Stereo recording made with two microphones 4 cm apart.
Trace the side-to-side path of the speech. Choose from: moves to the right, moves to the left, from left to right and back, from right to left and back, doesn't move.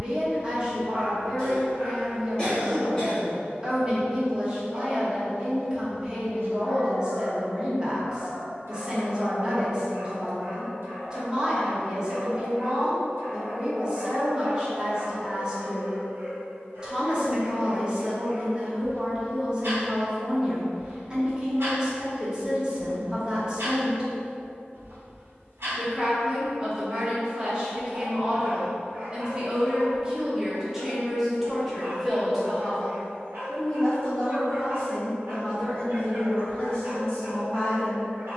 moves to the left.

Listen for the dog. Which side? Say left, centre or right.
right.